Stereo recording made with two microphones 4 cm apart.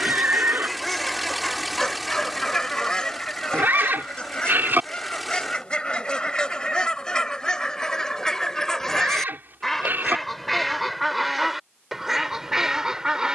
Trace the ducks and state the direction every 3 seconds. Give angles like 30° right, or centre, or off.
10° left, 20° left, 20° left, centre, 10° right.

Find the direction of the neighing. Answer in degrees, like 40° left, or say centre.
50° right.